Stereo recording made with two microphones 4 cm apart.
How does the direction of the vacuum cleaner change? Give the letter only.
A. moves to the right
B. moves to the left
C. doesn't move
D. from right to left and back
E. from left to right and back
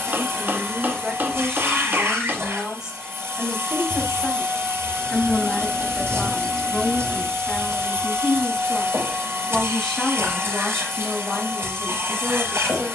C.